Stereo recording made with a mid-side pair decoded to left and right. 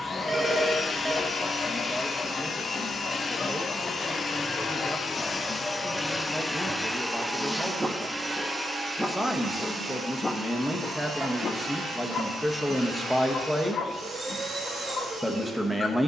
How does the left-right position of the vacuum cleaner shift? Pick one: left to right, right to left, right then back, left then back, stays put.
left to right.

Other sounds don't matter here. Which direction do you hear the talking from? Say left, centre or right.
centre.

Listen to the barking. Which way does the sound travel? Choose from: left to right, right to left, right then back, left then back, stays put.
right then back.